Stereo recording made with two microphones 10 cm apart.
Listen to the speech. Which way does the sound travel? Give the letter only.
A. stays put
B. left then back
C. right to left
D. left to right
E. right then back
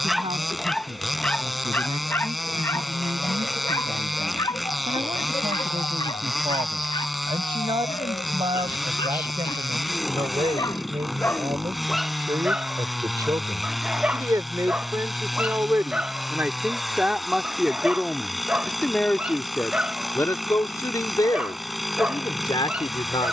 C.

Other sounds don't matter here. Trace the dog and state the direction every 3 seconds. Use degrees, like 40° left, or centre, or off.
10° left, 40° left, 50° left, 30° left, 10° right, 10° right, 10° right, 10° right.